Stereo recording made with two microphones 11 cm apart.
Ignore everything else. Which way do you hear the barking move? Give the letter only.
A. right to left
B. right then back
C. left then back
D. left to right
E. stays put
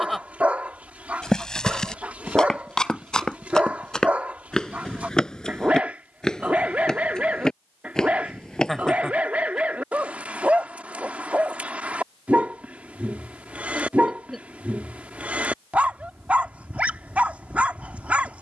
E.